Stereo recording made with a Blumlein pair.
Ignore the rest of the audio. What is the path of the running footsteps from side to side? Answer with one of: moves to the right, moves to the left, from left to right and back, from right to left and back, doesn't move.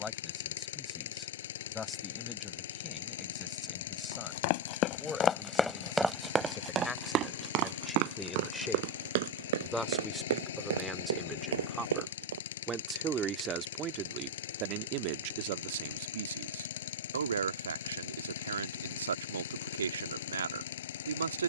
moves to the right.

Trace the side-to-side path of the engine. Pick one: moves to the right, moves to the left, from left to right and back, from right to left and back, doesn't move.
doesn't move.